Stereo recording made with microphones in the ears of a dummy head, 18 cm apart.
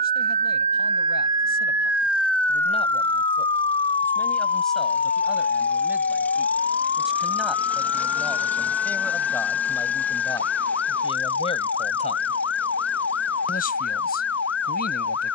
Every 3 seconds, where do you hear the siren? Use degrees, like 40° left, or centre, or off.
10° right, 40° left, 50° left, 60° left, 70° left.